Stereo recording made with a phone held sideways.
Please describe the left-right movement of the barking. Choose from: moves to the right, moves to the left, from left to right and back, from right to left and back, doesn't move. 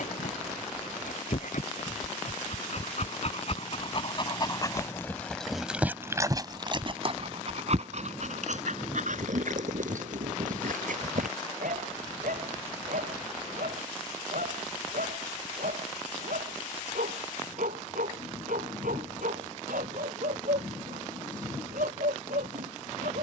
moves to the right.